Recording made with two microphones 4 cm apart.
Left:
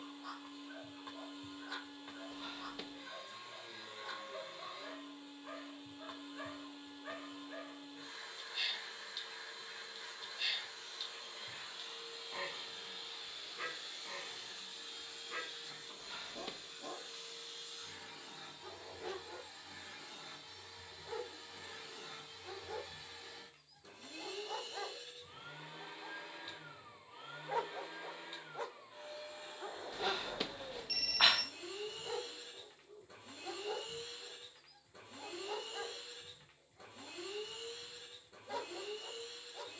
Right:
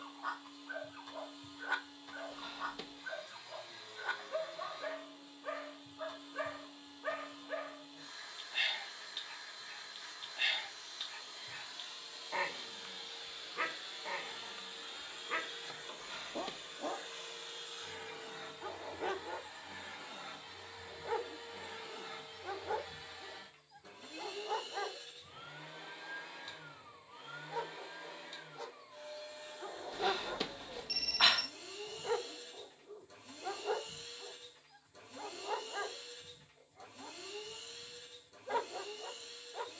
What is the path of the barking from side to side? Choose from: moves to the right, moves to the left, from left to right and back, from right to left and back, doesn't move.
from right to left and back.